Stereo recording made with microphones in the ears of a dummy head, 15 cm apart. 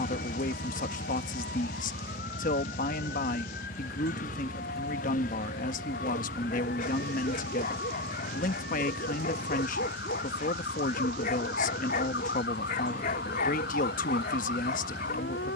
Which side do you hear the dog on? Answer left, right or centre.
left.